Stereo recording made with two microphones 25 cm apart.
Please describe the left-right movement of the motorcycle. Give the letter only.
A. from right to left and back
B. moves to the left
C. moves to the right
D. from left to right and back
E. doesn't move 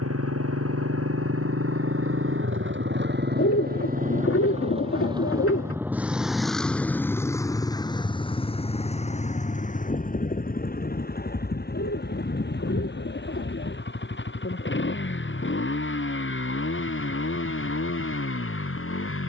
B.